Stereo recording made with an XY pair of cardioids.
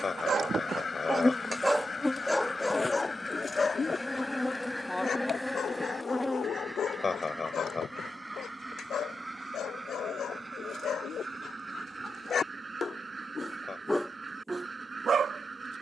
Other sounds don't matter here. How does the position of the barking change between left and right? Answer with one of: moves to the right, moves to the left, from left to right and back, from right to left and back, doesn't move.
from right to left and back.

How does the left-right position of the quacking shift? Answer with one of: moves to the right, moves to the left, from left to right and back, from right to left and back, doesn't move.
moves to the right.